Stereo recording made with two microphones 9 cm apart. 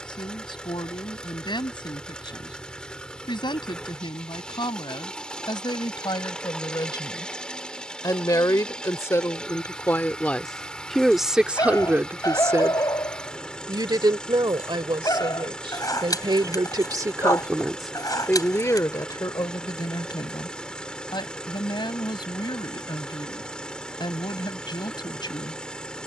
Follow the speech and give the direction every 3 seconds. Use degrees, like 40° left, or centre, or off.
60° left, 60° left, 50° left, 10° left, 50° right, 50° right, 50° left, 60° left, 60° left.